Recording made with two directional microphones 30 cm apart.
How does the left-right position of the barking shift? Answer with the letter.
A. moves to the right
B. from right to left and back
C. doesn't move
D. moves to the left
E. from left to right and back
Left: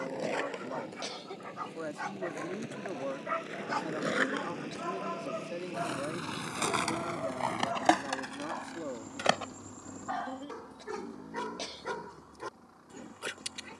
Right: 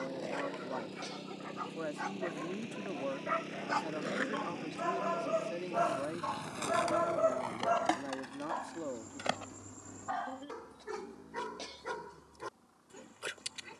E.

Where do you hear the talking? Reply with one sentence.
You can hear the talking in the centre.